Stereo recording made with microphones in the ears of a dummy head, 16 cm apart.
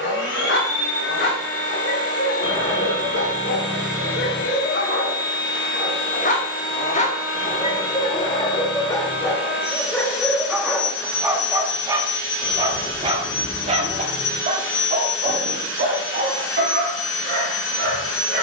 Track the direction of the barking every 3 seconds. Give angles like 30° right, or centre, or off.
70° left, 60° left, 30° left, centre, 30° right, 50° right.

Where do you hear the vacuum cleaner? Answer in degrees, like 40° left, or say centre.
70° left.